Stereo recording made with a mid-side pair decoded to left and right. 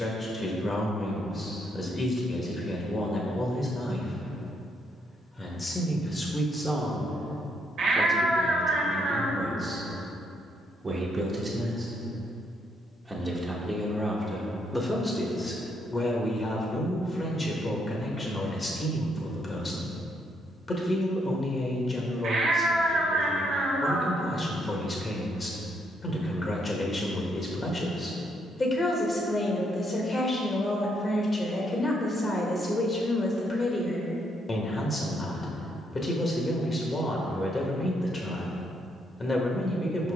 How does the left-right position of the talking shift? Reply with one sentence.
You can hear the talking move from left to right and back again.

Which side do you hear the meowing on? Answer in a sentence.
You can hear the meowing on the right.